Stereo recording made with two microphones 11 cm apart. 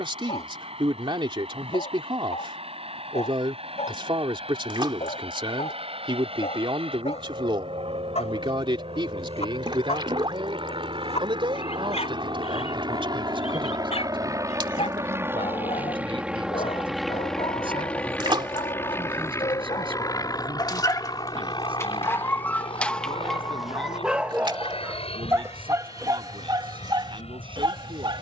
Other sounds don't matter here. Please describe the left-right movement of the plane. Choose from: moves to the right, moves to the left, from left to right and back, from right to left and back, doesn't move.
moves to the left.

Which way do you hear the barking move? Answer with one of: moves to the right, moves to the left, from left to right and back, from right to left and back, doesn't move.
moves to the right.